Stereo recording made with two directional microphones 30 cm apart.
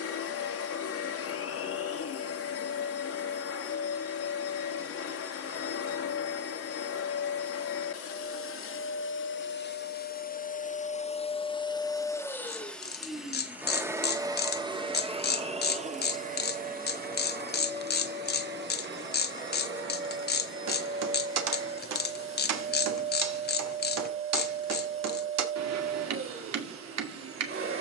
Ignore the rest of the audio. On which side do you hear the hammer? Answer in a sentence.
In this clip you hear the hammer on the right.